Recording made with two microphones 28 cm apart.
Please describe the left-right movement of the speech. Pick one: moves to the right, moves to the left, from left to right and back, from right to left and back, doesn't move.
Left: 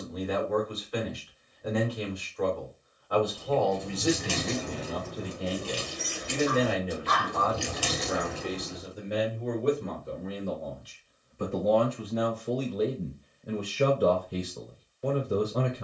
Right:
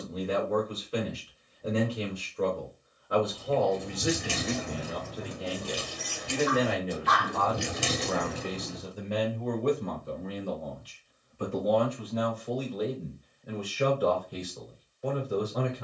moves to the left.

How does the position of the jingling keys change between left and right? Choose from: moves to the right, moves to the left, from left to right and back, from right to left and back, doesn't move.
moves to the right.